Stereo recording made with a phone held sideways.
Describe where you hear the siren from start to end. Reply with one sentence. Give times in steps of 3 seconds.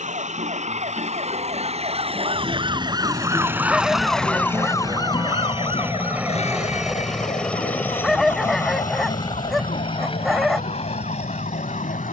In this clip you hear the siren on the right from 0 s, in the centre from 3 s and on the left from 6 s.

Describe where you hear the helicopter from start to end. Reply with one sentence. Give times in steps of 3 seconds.
You can hear the helicopter on the right from 0 s, in the centre from 6 s and on the left from 9 s.